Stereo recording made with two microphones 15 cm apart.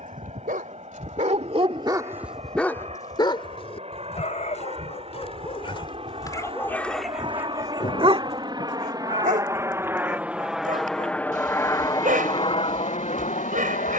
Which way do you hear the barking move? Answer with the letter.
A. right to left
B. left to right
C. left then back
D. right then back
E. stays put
C.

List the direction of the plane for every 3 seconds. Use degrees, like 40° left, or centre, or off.
50° right, 50° right, 40° right, centre, 40° left.